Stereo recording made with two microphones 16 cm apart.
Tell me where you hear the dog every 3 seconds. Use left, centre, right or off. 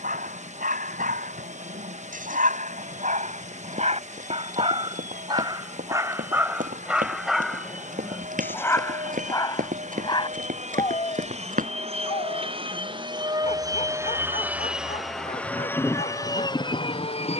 right, right, centre, left, left, left.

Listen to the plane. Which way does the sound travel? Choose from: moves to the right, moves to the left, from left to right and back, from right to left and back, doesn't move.
moves to the left.